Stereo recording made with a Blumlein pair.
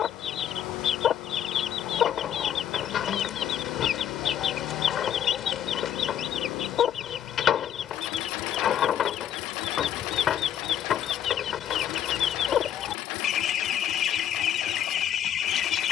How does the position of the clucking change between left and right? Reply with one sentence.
In this clip you hear the clucking stay put.